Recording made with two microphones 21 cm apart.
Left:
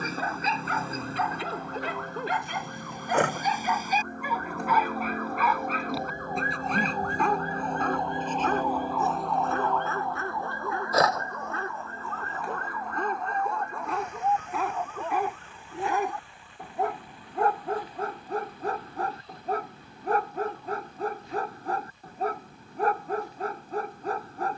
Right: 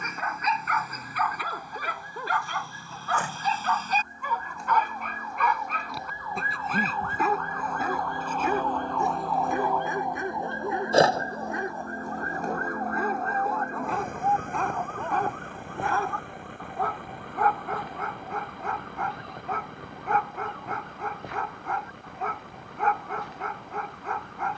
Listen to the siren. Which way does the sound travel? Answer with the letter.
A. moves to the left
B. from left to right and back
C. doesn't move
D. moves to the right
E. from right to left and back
D.